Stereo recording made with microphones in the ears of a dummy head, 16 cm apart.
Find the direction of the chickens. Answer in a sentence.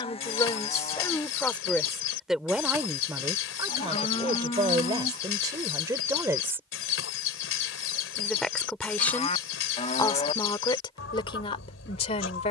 In this clip you hear the chickens on the left.